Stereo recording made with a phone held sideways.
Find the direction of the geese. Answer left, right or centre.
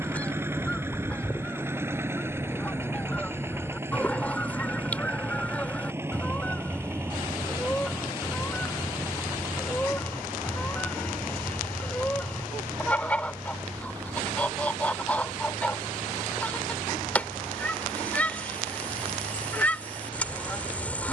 centre.